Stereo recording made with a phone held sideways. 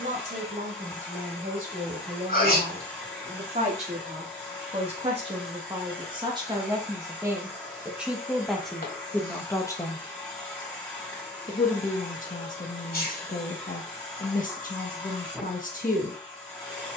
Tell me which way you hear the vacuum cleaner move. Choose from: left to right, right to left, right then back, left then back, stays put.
stays put.